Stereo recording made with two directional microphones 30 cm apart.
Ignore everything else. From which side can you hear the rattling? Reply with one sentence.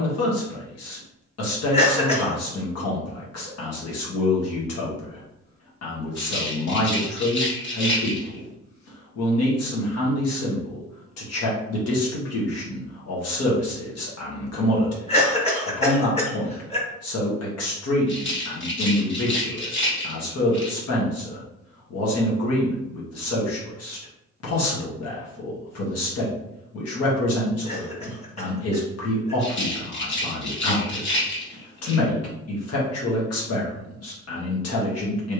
You can hear the rattling on the left.